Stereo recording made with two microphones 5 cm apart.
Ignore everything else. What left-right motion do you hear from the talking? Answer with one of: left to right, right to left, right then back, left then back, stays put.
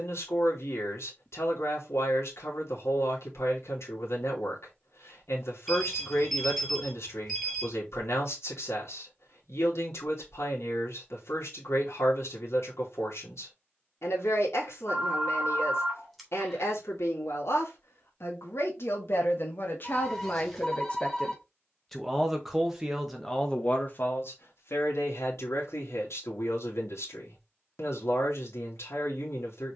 right then back.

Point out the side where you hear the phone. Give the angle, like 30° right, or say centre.
centre.